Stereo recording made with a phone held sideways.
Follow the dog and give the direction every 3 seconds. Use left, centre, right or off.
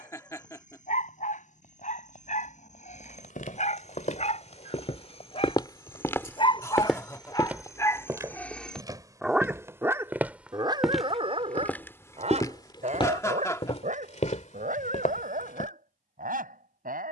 left, left, left, right, right, right.